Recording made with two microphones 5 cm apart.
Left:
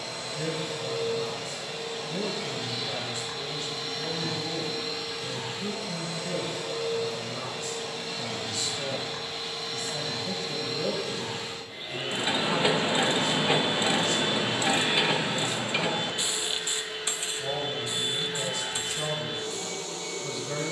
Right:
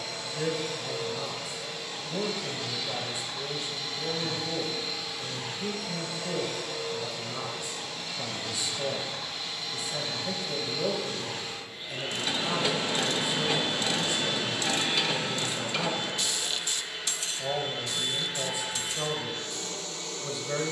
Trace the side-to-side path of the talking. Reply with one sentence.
You can hear the talking stay in one place.